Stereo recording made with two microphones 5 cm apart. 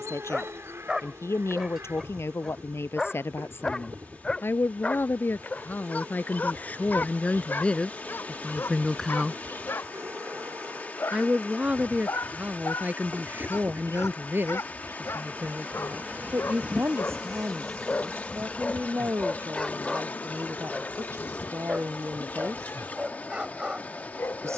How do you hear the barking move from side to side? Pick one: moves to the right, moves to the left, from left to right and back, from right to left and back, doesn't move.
from right to left and back.